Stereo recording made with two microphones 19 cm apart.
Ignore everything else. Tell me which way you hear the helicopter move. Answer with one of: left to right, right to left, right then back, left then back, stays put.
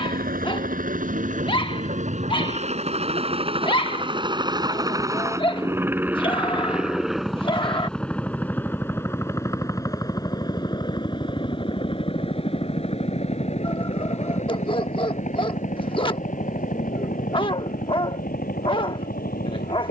right to left.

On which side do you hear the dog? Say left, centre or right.
left.